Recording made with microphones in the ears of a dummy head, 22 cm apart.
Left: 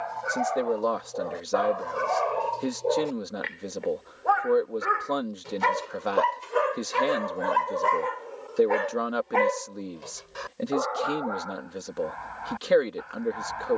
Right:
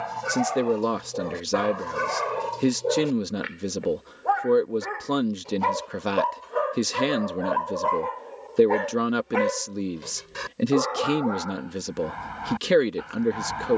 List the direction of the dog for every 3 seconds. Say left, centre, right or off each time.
right, centre, left, right, right.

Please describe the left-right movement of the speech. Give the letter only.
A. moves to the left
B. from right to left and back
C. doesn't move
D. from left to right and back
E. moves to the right
C.